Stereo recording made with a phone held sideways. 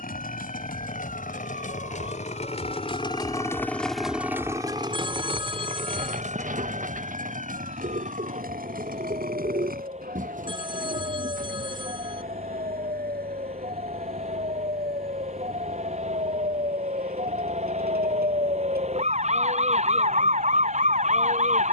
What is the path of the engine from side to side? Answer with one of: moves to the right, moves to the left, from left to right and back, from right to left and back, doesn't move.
moves to the right.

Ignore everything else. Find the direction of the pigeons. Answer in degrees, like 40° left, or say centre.
60° right.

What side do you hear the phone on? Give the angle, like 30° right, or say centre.
30° right.